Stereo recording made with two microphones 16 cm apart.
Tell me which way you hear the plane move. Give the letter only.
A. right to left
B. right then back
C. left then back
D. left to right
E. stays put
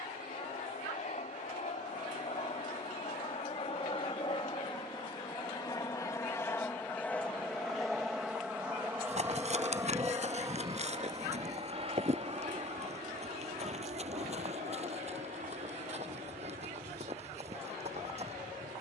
D.